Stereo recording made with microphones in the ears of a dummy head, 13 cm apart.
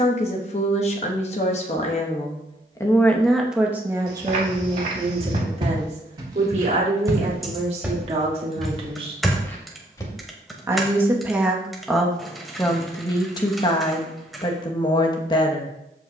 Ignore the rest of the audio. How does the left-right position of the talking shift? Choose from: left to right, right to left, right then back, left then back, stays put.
right then back.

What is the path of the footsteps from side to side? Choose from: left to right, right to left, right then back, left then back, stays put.
right to left.